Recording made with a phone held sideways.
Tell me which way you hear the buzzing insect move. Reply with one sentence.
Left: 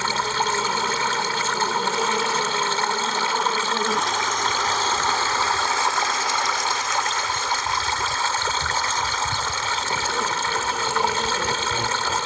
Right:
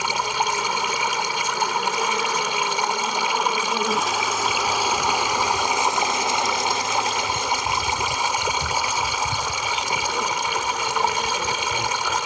In this clip you hear the buzzing insect move from left to right and back again.